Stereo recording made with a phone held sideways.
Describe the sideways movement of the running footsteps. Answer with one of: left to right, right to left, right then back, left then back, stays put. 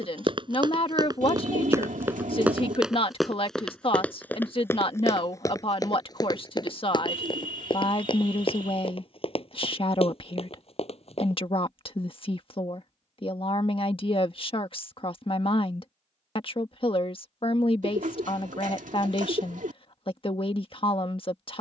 right to left.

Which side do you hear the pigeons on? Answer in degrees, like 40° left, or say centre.
80° right.